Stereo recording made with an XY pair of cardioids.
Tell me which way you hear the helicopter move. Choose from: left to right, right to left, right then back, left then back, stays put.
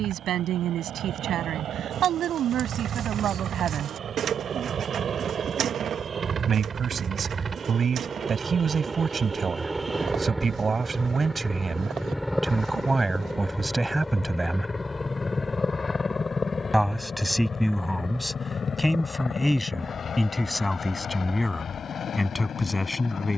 right to left.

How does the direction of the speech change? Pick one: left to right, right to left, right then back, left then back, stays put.
right to left.